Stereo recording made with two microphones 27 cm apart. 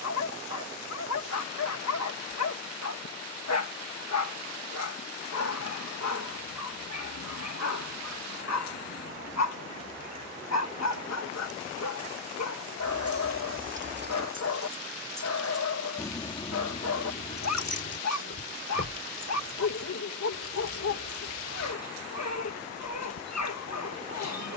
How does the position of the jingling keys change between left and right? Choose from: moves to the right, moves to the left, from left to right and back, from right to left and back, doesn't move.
moves to the left.